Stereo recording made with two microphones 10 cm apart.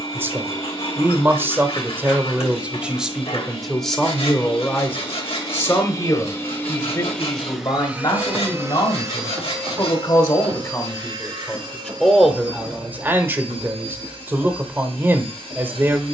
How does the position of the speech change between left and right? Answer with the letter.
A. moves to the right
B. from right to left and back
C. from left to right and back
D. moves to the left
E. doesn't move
B.